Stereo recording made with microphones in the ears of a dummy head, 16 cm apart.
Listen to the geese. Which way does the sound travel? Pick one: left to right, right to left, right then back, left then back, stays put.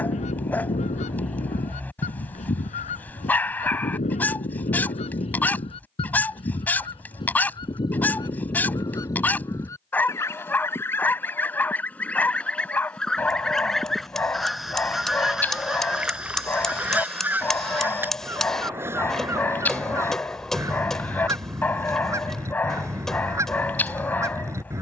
left to right.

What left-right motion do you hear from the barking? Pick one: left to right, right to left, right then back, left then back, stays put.
stays put.